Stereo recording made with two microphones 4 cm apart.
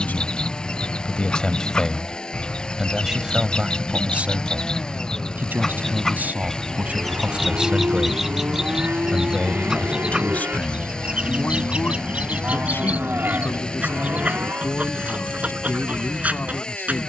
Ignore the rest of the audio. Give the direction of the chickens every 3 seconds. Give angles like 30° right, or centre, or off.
20° left, 20° left, centre, 20° right, 30° right, 30° right.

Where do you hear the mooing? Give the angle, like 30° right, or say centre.
50° right.